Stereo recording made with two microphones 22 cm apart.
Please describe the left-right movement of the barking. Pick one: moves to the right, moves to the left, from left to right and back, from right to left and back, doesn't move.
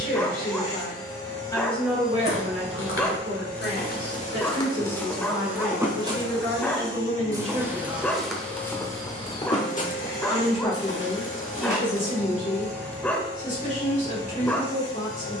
doesn't move.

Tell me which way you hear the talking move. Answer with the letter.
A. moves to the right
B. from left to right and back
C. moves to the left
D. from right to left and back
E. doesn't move
B.